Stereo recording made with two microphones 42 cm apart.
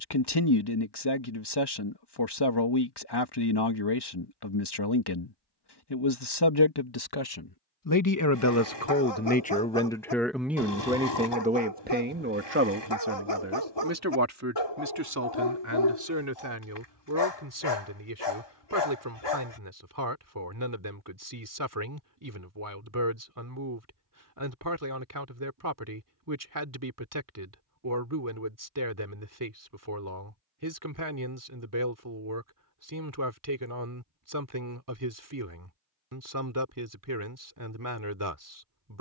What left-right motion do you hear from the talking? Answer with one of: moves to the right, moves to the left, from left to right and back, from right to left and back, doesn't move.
moves to the right.